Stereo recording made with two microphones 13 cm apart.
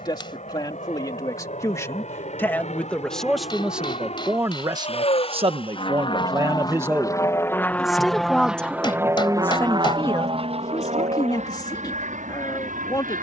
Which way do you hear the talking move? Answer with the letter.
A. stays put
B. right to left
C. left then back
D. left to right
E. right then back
E.